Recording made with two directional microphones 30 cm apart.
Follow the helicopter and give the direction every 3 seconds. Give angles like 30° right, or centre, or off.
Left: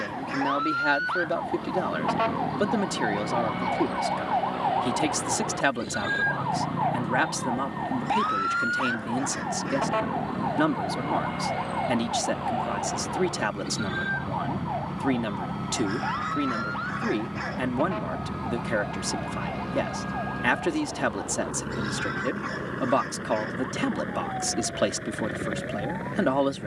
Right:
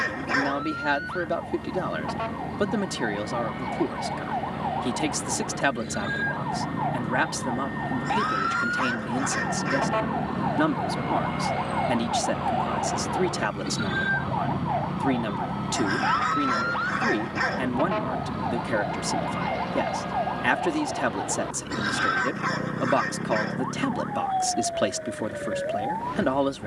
60° right, 60° right, 50° right, 30° right, 10° right, 10° left, 30° left, 50° left, 60° left.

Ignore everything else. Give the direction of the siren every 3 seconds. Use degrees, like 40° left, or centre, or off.
50° left, 40° left, 20° left, centre, 20° right, 30° right, 40° right, 50° right, 50° right.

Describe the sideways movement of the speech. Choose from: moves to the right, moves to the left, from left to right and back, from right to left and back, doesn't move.
doesn't move.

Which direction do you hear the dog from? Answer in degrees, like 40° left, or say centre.
40° right.